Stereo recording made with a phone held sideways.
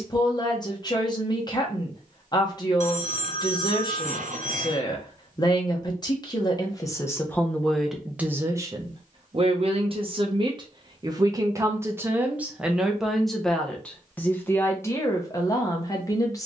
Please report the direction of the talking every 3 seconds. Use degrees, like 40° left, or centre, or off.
30° left, 30° left, 10° left, 30° right, centre, 20° left.